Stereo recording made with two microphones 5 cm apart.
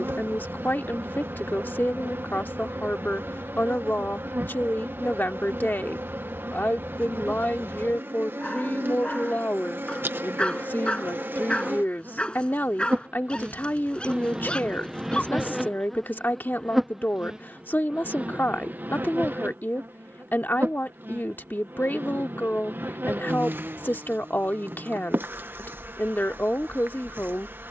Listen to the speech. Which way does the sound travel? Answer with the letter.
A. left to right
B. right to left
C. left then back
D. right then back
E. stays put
E.